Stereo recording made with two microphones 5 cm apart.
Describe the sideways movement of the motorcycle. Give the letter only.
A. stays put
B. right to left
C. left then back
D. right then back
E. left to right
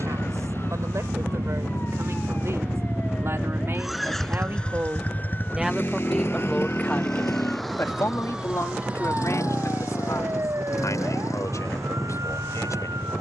B.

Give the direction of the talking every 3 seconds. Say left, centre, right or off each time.
right, right, left, left, left.